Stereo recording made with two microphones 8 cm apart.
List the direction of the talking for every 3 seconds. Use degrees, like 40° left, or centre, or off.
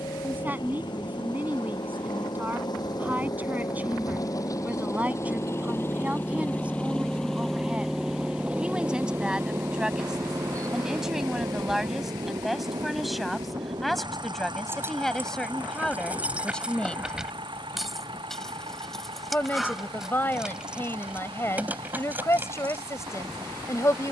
20° right, 20° right, 10° right, 10° right, centre, 10° left, 20° left, 30° left.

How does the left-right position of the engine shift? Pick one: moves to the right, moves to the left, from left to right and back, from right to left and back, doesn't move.
moves to the right.